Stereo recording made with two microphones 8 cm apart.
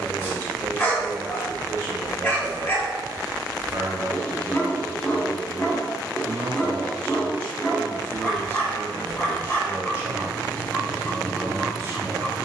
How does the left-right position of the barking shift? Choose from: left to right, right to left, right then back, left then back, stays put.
stays put.